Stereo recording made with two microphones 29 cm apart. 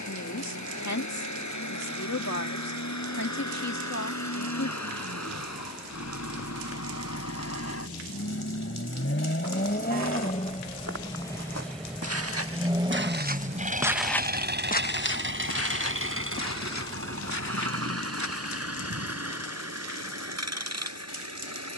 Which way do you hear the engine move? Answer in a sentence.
You can hear the engine travel towards the right.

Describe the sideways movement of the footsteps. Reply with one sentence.
You can hear the footsteps go from the right side to the left.